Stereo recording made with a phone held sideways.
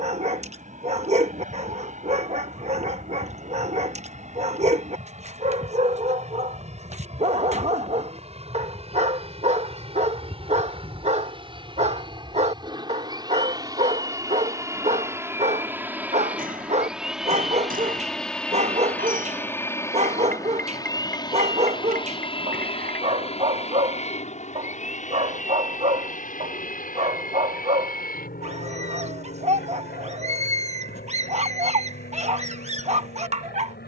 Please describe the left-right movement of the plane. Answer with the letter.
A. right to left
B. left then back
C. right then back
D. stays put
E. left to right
A.